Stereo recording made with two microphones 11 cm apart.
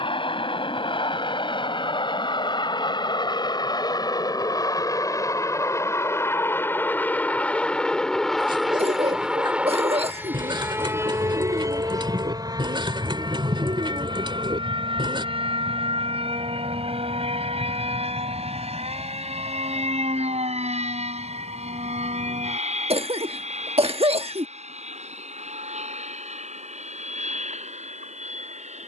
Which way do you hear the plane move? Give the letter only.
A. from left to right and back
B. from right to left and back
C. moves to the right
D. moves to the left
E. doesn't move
C.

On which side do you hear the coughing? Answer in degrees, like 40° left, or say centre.
70° right.